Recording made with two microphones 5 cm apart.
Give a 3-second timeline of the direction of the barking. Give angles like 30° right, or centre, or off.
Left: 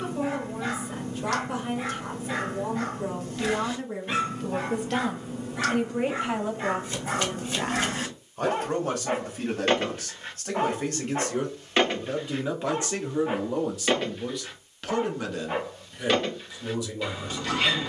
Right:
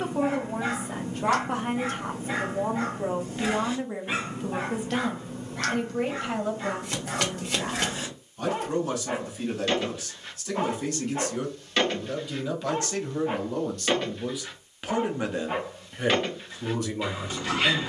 20° right, 10° right, 40° left, 30° left, 10° left, 10° right.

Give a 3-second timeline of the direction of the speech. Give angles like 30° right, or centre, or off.
50° right, 10° right, 30° left, 40° left, 10° left, 40° right.